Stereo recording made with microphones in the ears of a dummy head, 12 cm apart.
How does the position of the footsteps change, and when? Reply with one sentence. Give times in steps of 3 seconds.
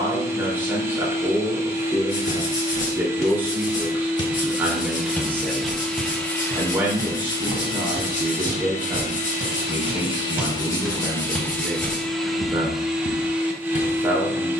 In this clip you hear the footsteps on the left from 0 s, on the right from 6 s, in the centre from 9 s and on the left from 12 s.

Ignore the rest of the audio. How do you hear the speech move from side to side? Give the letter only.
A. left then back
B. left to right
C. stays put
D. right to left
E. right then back
C.